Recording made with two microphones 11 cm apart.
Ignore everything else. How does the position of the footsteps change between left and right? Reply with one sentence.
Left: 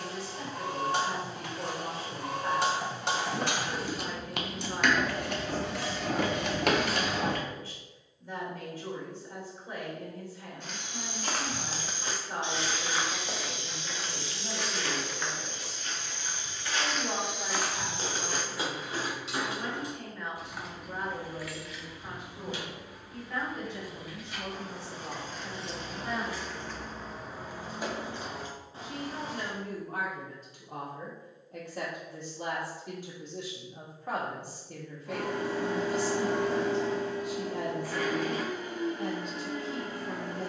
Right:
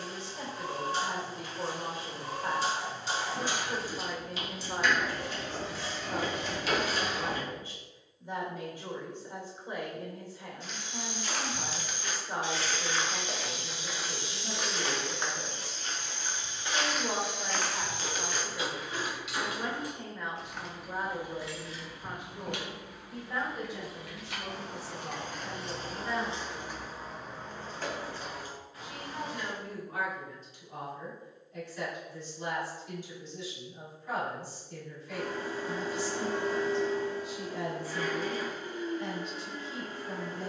You can hear the footsteps go right and come back.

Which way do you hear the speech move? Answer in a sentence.
In this clip you hear the speech move to the left.